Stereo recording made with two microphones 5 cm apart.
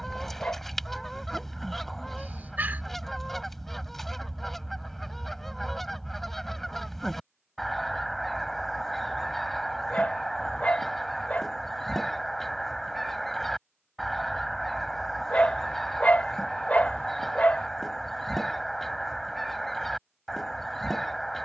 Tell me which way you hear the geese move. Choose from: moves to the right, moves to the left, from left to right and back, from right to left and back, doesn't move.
doesn't move.